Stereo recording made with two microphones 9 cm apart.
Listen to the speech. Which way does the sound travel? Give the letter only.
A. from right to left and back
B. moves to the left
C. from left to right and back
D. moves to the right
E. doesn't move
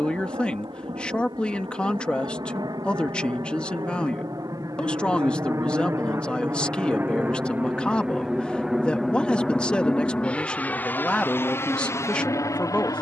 E.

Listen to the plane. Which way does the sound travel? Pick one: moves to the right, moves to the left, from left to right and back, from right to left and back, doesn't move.
moves to the left.